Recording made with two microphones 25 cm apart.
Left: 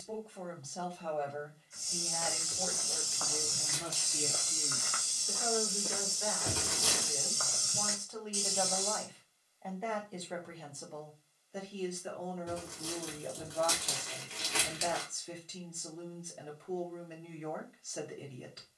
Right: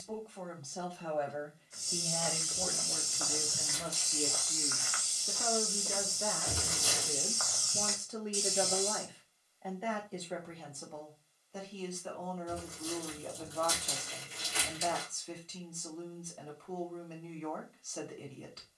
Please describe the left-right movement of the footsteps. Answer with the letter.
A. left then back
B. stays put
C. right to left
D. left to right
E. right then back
A.